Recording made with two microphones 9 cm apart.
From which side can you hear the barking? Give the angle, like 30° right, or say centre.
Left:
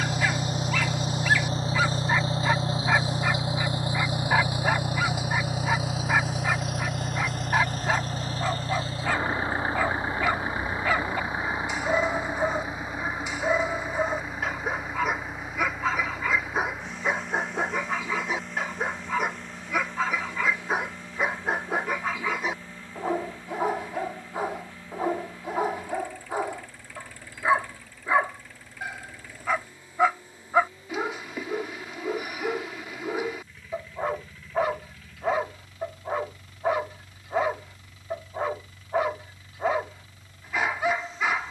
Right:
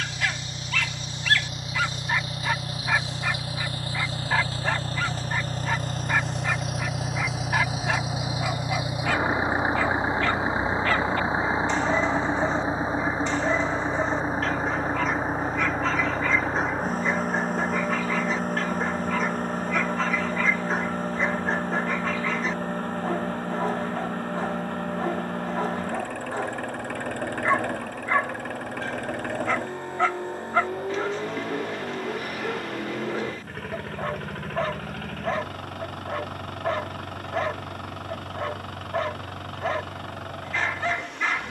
10° left.